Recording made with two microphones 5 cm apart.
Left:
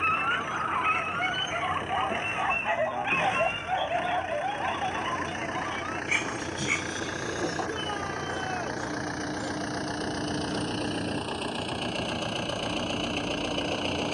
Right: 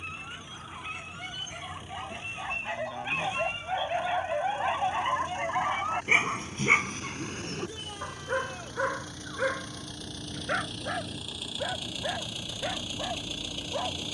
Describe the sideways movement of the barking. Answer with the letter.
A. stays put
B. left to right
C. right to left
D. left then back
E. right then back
B.